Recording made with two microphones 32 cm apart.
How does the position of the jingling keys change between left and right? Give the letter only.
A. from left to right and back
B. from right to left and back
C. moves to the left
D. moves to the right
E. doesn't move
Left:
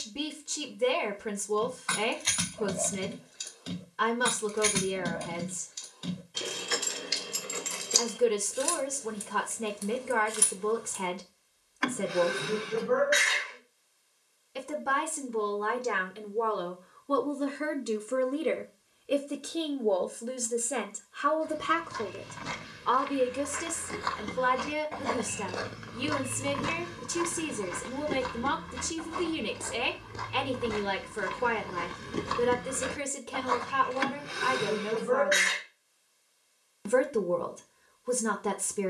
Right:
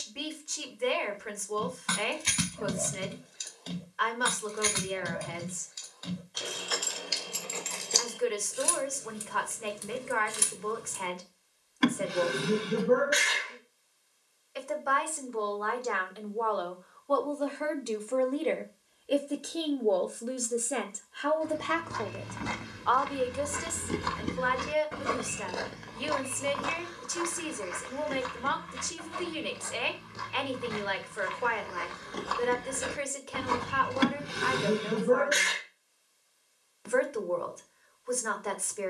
B.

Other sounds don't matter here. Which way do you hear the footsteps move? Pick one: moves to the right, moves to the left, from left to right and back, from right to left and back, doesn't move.
from right to left and back.